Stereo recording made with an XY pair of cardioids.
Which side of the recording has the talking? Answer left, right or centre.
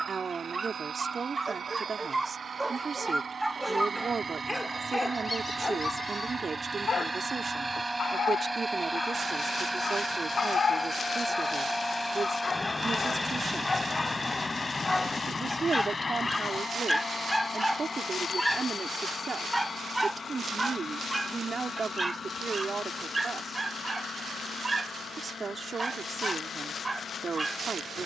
right.